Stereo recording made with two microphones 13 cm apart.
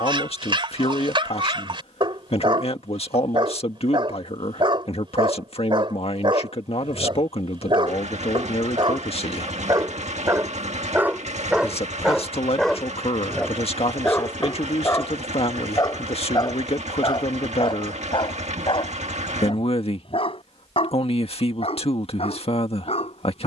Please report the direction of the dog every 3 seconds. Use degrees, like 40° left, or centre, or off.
40° right, 40° right, 40° right, 20° right, 10° left, 40° left, 50° left, 50° left.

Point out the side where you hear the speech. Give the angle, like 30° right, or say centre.
50° left.